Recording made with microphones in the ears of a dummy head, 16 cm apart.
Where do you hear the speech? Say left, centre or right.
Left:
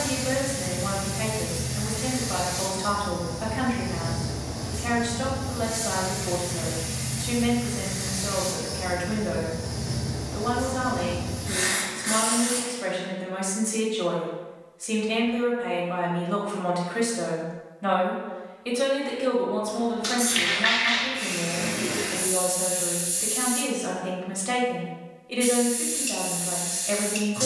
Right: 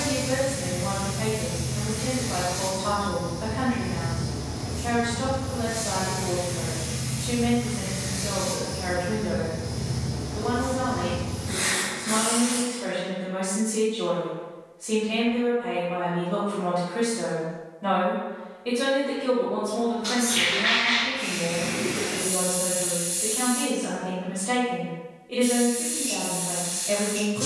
left.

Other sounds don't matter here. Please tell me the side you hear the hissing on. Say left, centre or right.
left.